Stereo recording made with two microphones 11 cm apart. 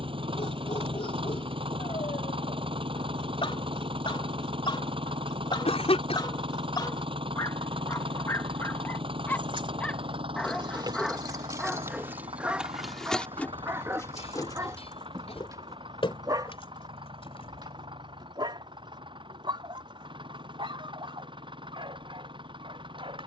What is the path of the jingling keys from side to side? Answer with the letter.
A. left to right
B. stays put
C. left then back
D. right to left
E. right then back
D.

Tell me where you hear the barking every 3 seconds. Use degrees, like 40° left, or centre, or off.
70° left, 50° left, 30° left, centre, 20° right, 40° right, 50° right, 60° right.